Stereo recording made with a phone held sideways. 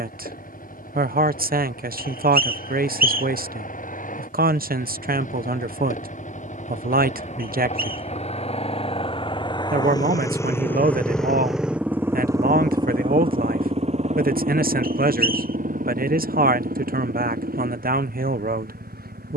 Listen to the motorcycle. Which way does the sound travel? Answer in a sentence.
In this clip you hear the motorcycle go from the left side to the right.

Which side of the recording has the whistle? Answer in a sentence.
You can hear the whistle on the right.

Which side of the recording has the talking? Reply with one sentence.
You can hear the talking on the right.